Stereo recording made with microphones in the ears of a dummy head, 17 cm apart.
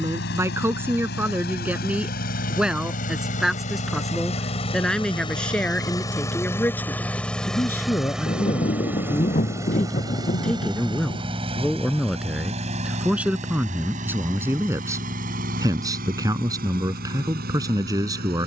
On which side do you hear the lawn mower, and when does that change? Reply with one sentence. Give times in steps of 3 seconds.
In this clip you hear the lawn mower on the left from 0 s, in the centre from 6 s and on the right from 9 s.